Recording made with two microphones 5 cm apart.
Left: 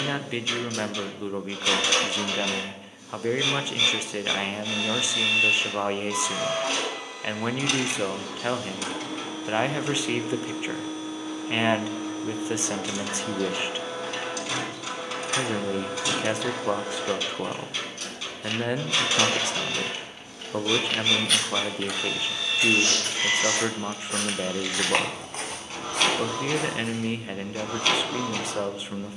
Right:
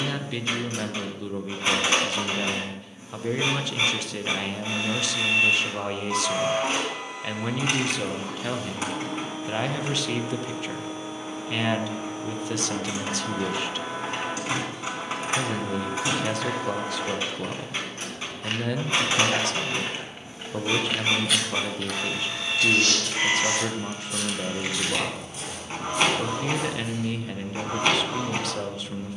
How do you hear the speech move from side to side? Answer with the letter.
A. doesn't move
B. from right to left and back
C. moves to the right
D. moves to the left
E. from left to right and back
A.